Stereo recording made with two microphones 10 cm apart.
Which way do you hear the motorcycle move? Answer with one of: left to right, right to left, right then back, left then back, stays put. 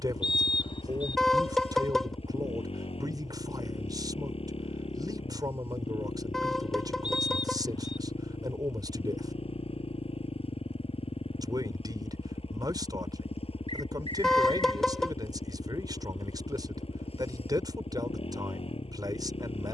stays put.